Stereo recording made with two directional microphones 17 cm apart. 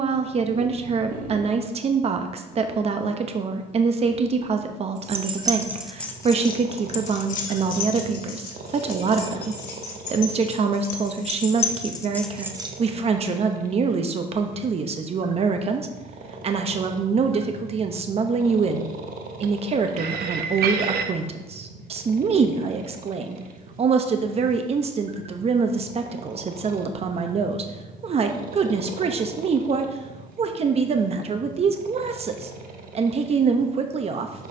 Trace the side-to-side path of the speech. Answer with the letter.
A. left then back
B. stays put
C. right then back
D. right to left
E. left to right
B.